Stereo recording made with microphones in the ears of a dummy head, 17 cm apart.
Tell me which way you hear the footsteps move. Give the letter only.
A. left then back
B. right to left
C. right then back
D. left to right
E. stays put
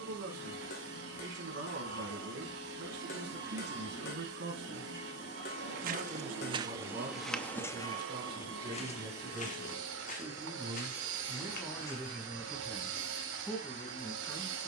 B.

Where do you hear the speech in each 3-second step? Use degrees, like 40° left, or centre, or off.
60° right, 60° right, 40° right, 10° right, 10° left.